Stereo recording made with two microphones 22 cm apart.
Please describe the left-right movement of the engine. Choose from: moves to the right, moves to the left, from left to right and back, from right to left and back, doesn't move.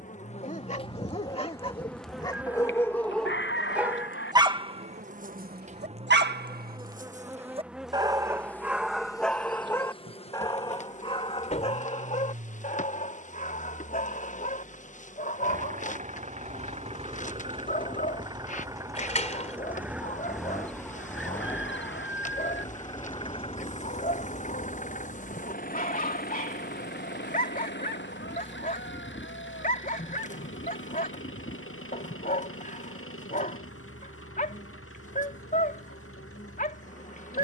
moves to the left.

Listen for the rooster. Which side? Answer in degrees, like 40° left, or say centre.
60° left.